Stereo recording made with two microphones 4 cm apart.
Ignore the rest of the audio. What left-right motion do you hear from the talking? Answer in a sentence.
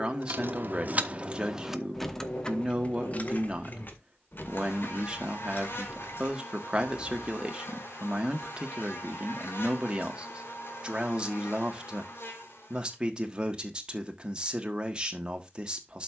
In this clip you hear the talking stay in one place.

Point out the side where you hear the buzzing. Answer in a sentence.
In this clip you hear the buzzing on the left.